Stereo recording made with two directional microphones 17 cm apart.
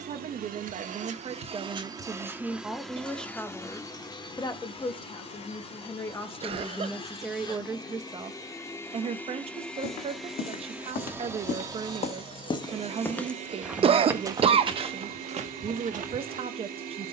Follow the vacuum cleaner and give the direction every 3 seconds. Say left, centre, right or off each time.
right, left, left, centre, right, right.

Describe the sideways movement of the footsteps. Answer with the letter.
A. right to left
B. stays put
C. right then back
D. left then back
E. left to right
E.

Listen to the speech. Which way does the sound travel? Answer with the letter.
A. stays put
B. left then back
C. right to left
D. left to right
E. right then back
B.